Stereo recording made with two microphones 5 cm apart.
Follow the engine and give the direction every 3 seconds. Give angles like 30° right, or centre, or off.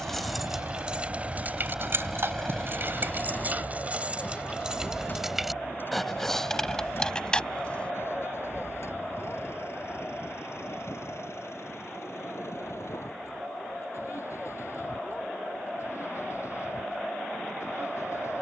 20° right, 30° left, 50° left, 60° left, 60° left, 70° left.